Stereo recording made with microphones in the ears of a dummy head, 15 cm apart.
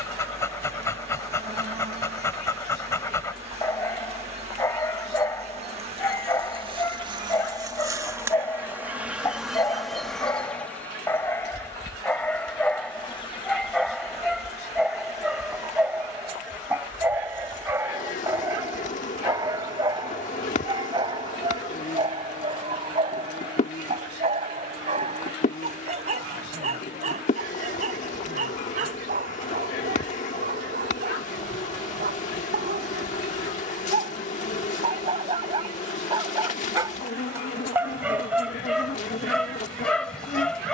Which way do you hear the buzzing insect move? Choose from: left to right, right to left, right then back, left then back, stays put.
right to left.